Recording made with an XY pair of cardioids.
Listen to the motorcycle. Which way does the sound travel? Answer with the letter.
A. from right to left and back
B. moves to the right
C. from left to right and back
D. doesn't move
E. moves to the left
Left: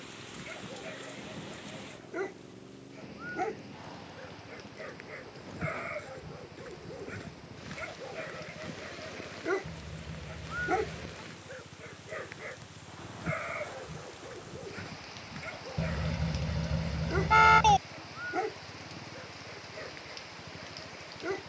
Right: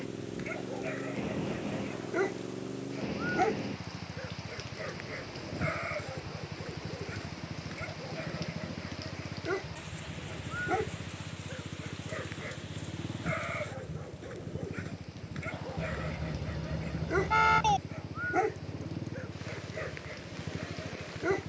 D.